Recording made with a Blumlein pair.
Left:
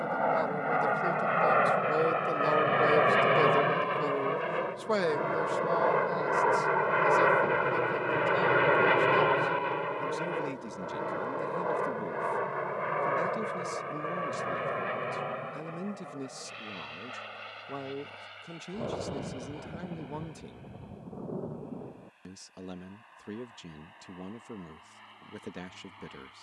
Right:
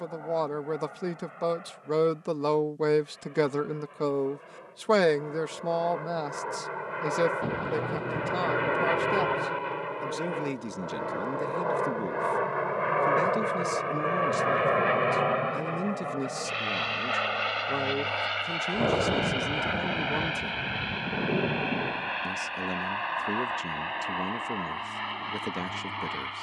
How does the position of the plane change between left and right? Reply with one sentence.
In this clip you hear the plane go from the left side to the right.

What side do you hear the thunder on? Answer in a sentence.
You can hear the thunder on the right.